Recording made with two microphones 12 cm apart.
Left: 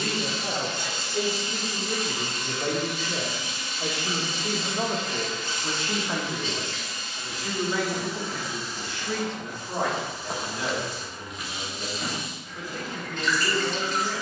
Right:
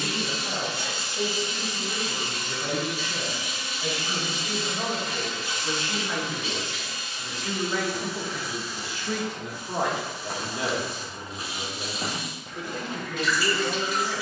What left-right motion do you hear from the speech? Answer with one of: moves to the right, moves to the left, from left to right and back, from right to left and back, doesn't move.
moves to the right.